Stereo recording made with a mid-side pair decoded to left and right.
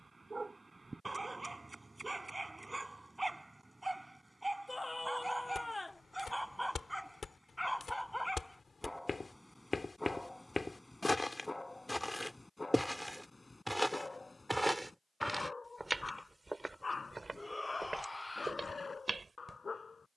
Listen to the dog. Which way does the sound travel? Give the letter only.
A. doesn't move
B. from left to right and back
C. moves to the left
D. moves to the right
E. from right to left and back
C.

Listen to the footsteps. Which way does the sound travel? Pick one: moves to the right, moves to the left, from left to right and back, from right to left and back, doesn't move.
moves to the right.